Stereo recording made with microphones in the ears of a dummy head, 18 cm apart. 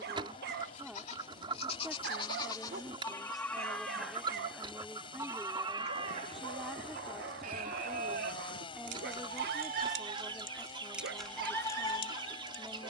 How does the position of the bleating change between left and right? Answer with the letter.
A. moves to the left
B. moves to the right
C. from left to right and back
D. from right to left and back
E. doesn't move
C.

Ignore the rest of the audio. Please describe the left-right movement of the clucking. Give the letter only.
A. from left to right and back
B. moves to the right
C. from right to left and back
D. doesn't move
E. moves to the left
D.